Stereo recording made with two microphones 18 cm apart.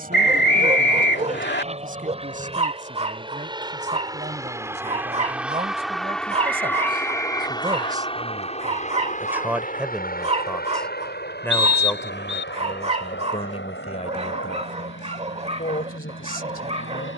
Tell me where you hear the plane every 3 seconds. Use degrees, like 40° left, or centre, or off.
40° right, 20° right, 20° left, 50° left, 70° left, 80° left.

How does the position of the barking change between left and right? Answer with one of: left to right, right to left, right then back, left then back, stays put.
stays put.